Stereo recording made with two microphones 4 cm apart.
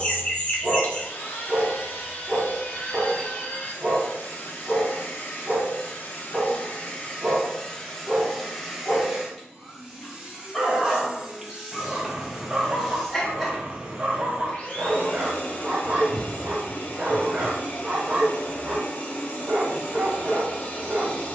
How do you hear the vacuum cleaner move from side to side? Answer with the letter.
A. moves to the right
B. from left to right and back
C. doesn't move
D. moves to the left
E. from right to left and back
B.